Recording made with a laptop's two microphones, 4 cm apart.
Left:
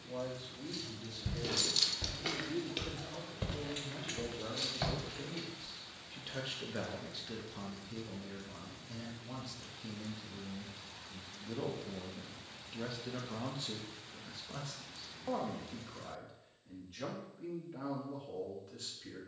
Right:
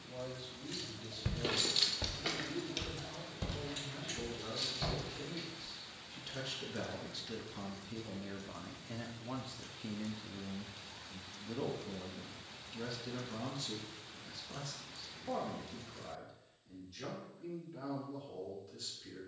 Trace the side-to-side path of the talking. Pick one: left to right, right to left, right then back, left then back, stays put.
right then back.